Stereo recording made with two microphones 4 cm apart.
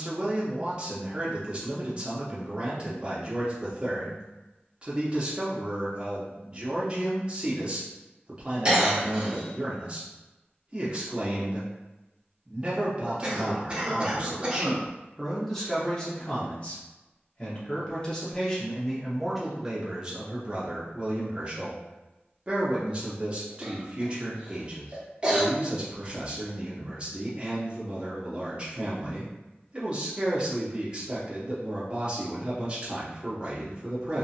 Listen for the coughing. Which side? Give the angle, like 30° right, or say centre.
20° right.